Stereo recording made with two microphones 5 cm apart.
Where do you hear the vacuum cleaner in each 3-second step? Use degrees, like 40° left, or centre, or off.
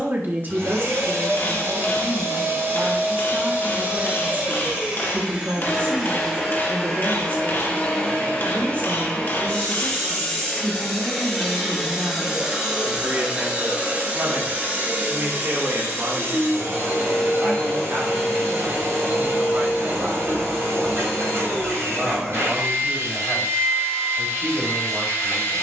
60° right, 20° right, 10° left, 10° left, 20° right, 50° right, 60° right, 60° right, 60° right.